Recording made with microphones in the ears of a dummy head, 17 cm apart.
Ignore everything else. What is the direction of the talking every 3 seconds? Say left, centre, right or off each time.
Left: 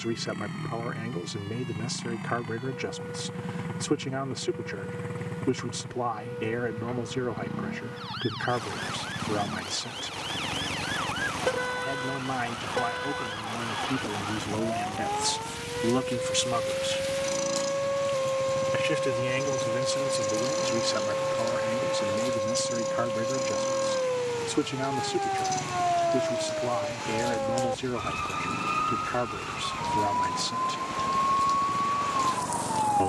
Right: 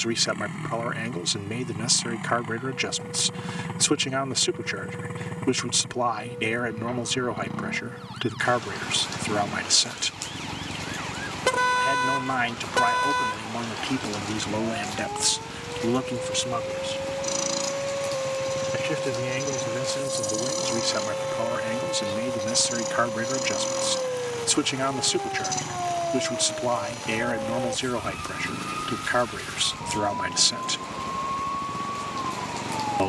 right, right, right, right, right, centre, centre, right, right, right, right.